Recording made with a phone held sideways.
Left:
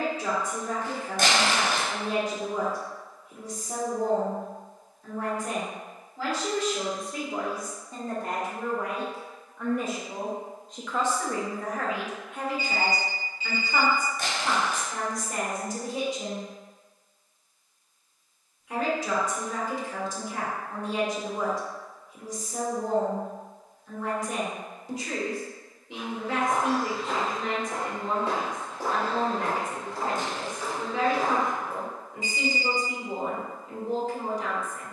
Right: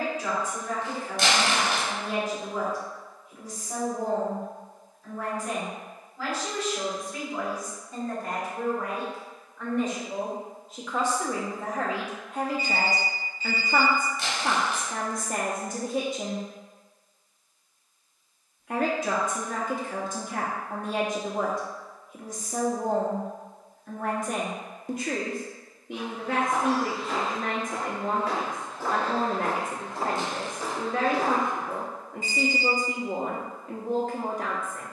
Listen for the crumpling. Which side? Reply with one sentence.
In this clip you hear the crumpling on the left.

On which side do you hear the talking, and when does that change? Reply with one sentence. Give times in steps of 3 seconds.
In this clip you hear the talking on the left from 0 s, in the centre from 9 s and on the right from 12 s.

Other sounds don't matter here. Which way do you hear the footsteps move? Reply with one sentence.
You can hear the footsteps move from left to right.